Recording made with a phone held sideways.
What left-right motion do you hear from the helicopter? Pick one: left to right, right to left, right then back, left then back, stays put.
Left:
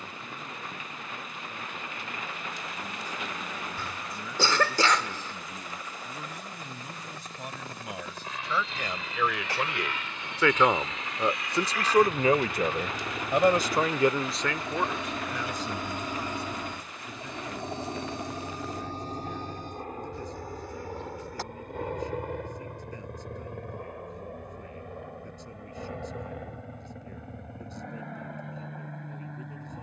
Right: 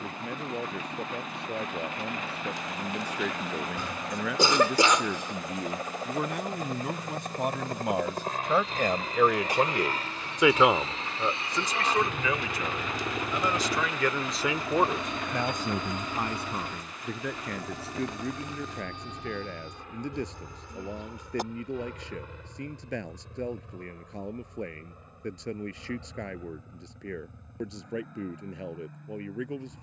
right to left.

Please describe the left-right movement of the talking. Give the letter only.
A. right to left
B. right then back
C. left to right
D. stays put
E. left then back
E.